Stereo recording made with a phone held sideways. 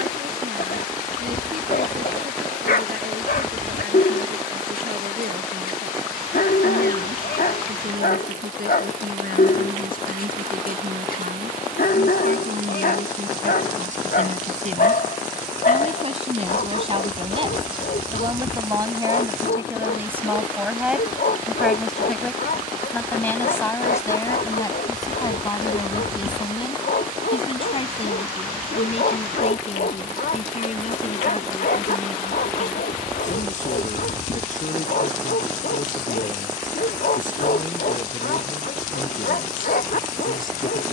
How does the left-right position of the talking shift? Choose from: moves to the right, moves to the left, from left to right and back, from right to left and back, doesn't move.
moves to the left.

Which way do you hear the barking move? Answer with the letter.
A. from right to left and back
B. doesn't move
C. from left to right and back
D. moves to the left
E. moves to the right
B.